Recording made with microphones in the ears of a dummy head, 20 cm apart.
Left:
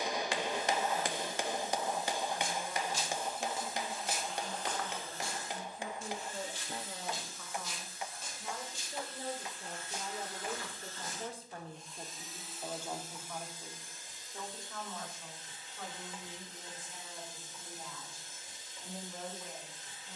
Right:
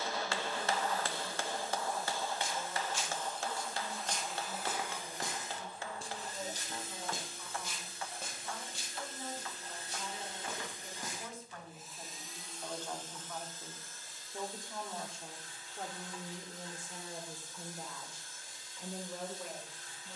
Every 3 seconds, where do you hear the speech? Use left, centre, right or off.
left, left, left, left, centre, right, right.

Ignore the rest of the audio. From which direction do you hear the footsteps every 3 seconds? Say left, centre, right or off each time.
left, centre, right, right, off, off, off.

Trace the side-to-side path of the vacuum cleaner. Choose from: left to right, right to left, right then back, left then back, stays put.
right then back.